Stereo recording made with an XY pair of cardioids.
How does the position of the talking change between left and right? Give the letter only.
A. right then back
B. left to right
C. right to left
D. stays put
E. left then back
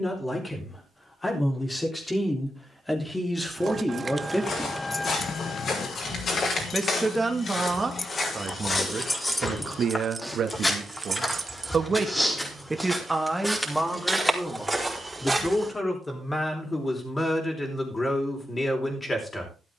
A.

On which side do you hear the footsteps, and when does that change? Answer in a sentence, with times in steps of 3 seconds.
You can hear the footsteps not at all from 0 s, on the left from 3 s, in the centre from 12 s and not at all from 18 s.